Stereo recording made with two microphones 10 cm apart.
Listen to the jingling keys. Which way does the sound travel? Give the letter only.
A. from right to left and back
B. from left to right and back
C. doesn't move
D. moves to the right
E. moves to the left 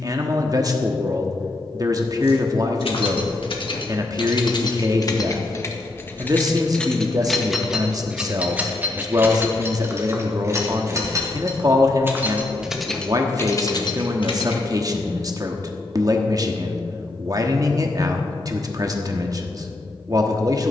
B.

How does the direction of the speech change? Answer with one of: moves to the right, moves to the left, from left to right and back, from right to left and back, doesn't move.
doesn't move.